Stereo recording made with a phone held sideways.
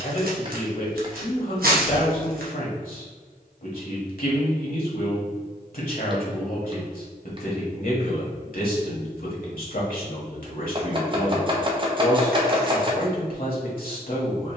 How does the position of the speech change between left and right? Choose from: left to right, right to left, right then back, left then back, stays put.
stays put.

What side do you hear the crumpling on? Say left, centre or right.
right.